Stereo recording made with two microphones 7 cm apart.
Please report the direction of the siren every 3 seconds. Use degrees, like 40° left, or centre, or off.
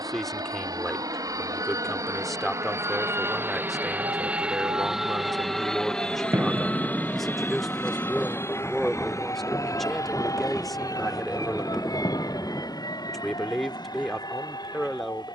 70° right, 60° right, centre, 60° left, 80° left.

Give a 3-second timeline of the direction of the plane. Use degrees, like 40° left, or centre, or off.
50° right, 10° right, 30° left, 50° left, 50° left.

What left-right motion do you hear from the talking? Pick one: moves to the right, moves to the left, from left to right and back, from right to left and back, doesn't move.
doesn't move.